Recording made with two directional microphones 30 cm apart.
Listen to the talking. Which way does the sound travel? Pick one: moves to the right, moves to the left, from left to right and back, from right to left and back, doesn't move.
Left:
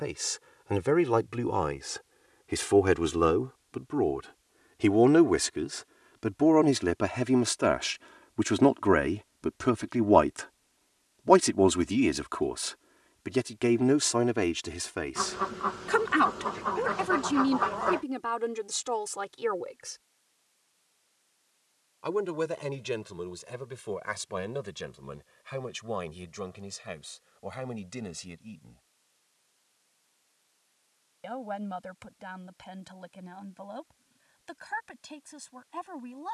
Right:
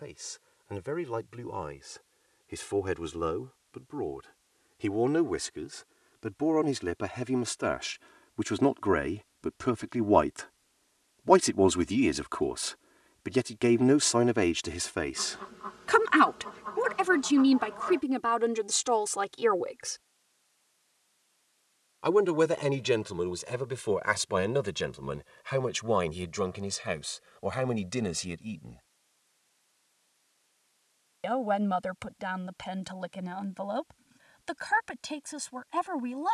moves to the right.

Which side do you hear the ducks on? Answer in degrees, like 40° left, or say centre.
60° left.